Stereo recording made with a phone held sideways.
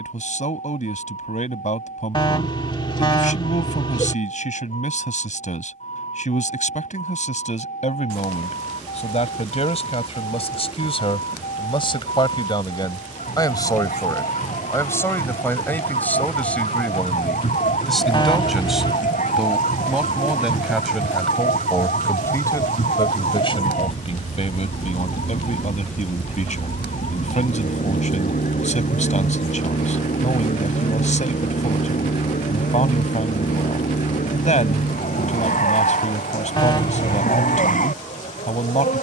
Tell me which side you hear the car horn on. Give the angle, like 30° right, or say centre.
30° left.